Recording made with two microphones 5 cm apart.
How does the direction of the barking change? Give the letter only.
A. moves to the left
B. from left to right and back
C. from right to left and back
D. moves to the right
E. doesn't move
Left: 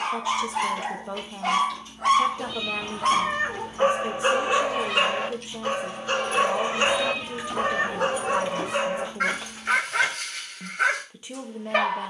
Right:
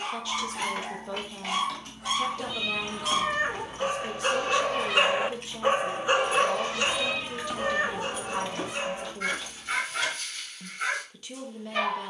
B.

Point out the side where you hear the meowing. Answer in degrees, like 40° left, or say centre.
10° right.